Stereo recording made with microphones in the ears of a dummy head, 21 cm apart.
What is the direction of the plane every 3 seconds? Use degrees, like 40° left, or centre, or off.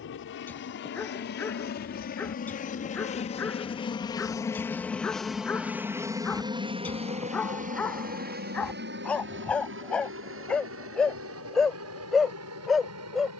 40° left, 10° left, 30° right, 50° right, 60° right.